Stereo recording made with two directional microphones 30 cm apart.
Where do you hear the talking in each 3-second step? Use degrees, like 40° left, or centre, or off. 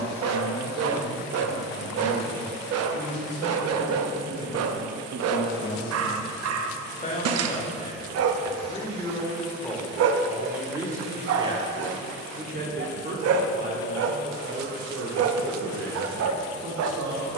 50° left, 40° left, 20° left, 10° right, 40° right, 60° right.